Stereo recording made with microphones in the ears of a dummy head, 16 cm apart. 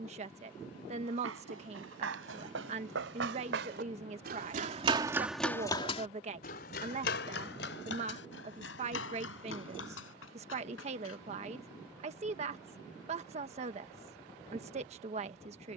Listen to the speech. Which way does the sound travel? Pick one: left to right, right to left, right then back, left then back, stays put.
stays put.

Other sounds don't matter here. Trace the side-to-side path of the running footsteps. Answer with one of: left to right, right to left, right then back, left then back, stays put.
right to left.